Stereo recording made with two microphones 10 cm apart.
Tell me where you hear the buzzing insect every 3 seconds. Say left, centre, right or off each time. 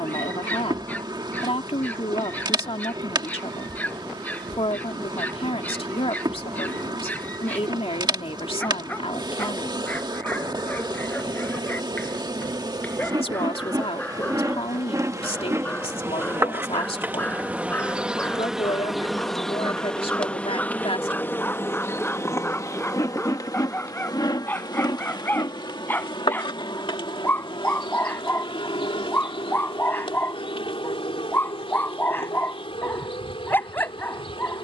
right, right, right, right, right, right, centre, left, left, left, left, left.